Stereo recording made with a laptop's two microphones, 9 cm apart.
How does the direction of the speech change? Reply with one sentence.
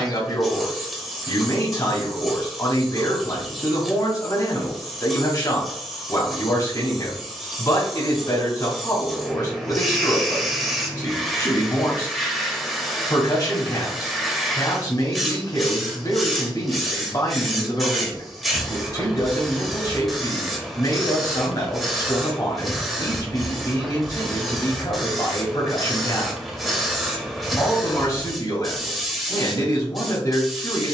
You can hear the speech stay in one place.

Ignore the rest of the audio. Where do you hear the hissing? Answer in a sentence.
You can hear the hissing in the centre.